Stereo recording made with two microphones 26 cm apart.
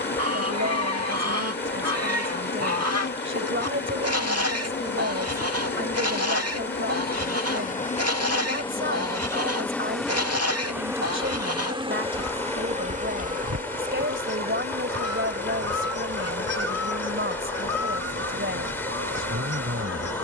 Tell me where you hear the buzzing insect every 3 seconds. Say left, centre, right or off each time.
left, left, left, centre, right, right, right.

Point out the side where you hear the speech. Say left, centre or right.
right.